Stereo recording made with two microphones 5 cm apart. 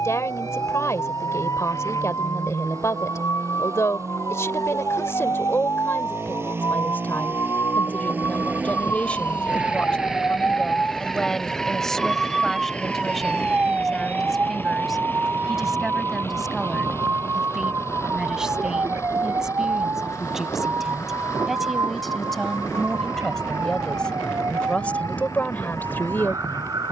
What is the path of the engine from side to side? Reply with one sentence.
You can hear the engine travel towards the left.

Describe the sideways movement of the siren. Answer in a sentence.
You can hear the siren move to the right.